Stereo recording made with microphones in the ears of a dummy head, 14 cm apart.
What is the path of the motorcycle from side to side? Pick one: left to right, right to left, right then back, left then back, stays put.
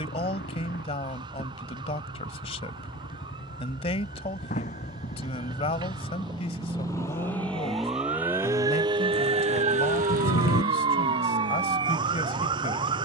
left to right.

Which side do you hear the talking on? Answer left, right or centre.
left.